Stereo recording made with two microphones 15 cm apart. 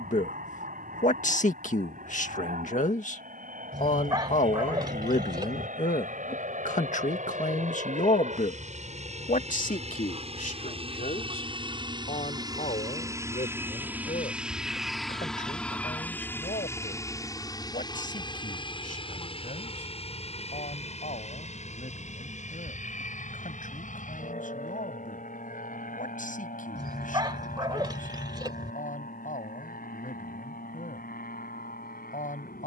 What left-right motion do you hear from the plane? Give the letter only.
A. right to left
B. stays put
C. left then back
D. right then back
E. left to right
A.